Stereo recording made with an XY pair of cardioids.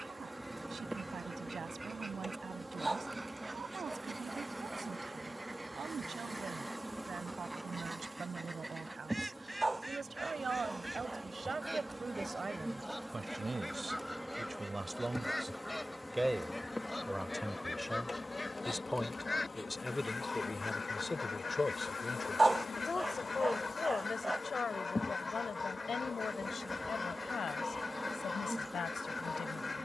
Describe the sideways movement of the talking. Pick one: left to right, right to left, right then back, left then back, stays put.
right to left.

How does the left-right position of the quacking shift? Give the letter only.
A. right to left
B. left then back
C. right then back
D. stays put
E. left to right
A.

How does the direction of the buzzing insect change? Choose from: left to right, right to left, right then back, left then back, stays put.
left then back.